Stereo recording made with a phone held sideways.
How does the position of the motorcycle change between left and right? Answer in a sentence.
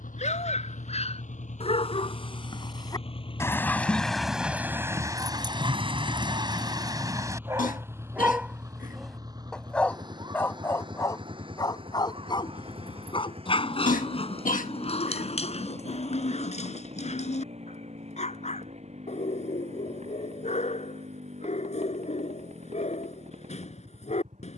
You can hear the motorcycle move from left to right.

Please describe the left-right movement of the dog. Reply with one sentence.
You can hear the dog move from left to right and back again.